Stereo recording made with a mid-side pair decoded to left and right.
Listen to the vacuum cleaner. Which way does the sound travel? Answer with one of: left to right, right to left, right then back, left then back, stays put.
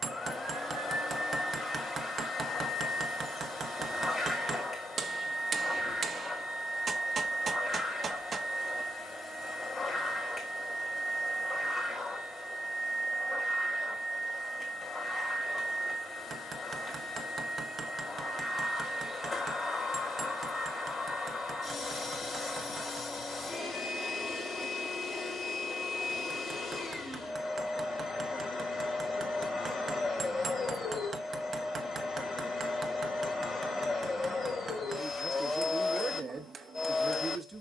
stays put.